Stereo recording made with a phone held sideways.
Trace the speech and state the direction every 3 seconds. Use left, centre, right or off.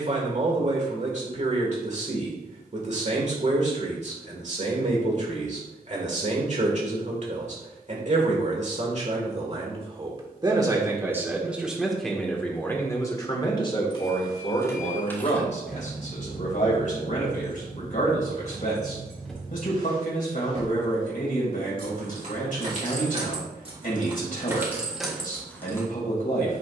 right, right, right, right, left, left, left, left, left.